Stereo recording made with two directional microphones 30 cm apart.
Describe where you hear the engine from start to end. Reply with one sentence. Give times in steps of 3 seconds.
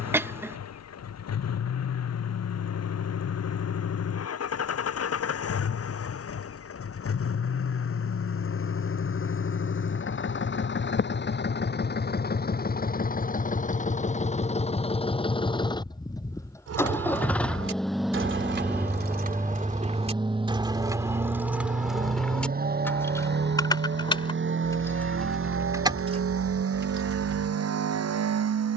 In this clip you hear the engine on the left from 0 s, in the centre from 15 s and on the right from 21 s.